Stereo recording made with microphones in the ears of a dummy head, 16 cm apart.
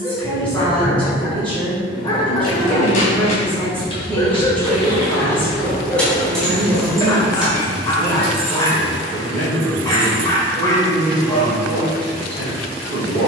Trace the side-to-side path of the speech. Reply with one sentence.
In this clip you hear the speech stay put.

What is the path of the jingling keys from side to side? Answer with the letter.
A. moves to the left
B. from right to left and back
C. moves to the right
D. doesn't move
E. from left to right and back
C.